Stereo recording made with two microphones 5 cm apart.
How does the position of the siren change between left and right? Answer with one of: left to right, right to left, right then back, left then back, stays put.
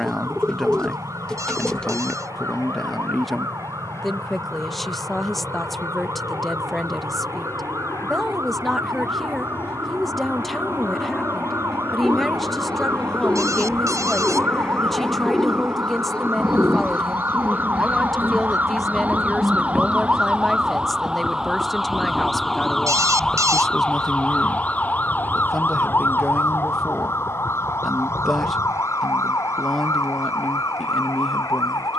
right to left.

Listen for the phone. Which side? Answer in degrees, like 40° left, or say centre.
70° right.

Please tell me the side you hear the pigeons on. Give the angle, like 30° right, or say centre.
20° left.